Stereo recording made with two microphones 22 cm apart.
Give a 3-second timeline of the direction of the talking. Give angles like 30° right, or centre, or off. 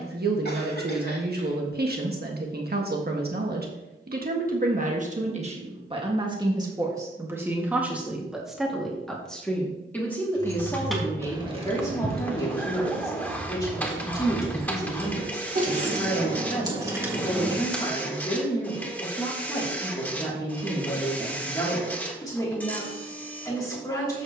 50° right, 40° right, 10° right, 10° left, 20° left, 20° left, 20° left, 20° left.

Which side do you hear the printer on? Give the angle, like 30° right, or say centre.
10° left.